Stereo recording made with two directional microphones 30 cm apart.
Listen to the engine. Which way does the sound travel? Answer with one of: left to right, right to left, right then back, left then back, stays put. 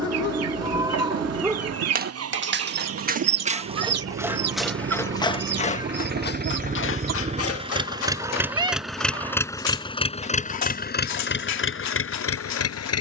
right to left.